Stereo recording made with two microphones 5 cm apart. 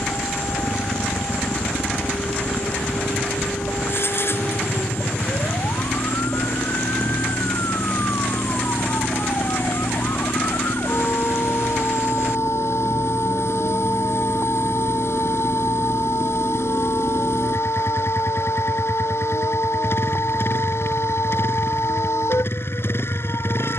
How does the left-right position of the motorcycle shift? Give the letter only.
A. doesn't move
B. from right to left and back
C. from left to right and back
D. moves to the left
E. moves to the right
A.